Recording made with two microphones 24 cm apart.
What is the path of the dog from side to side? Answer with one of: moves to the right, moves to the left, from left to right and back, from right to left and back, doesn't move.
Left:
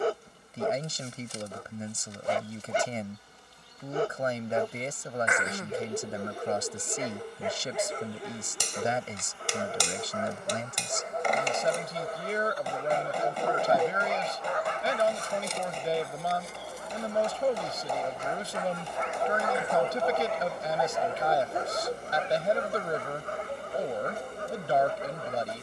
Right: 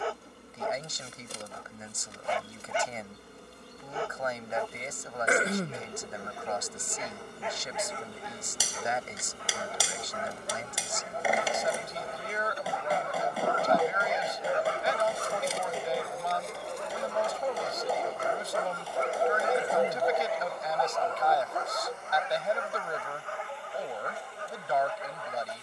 from left to right and back.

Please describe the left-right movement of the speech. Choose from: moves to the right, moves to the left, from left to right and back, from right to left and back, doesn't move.
doesn't move.